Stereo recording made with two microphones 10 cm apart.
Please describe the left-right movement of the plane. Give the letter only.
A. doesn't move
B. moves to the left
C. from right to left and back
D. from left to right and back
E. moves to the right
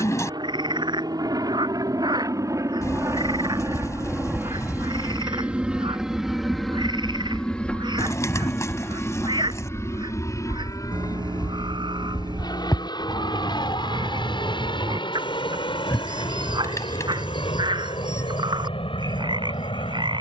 B.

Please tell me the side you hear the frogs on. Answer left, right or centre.
right.